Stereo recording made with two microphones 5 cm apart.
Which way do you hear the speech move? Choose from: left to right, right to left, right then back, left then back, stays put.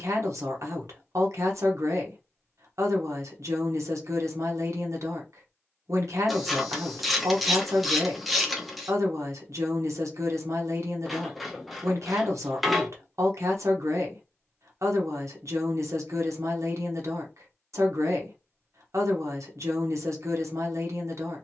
stays put.